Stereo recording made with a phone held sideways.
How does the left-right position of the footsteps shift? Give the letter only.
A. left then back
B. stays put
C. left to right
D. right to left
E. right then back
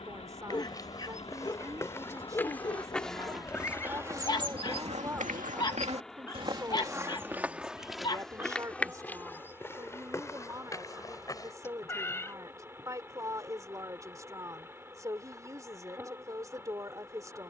E.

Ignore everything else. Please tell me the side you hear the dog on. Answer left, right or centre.
left.